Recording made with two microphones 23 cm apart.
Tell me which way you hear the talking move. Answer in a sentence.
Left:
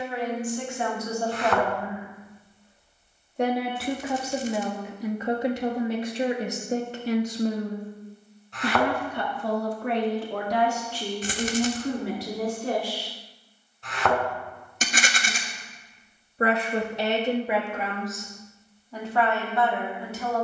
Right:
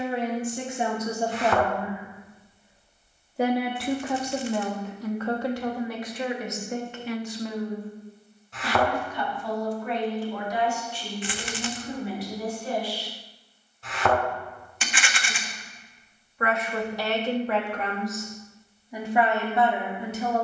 You can hear the talking move from right to left and back again.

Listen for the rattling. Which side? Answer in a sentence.
You can hear the rattling on the left.